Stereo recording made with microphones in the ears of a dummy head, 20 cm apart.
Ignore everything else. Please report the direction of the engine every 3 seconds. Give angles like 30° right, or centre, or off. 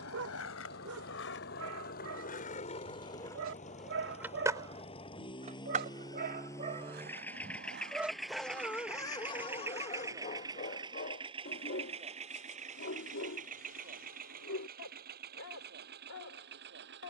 40° left, 30° left, 10° left, 20° right, 40° right, 50° right.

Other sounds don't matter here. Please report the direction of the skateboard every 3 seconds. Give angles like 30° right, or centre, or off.
50° left, 10° right, 50° right, 60° right, off, off.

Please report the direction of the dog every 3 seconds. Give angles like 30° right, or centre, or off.
70° right, 60° right, 10° right, 40° left, 60° left, 70° left.